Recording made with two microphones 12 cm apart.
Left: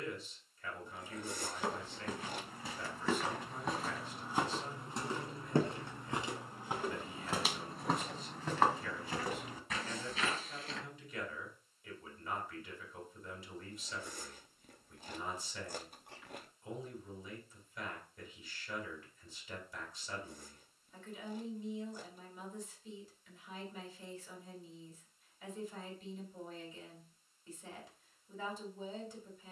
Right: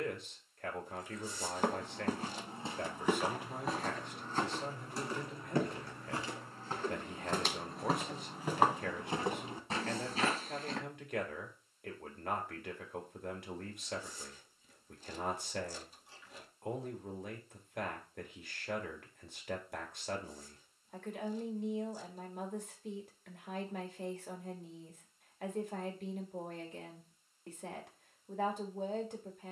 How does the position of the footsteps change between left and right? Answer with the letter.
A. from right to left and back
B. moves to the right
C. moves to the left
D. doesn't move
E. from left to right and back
A.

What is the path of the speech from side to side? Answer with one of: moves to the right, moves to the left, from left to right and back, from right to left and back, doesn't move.
doesn't move.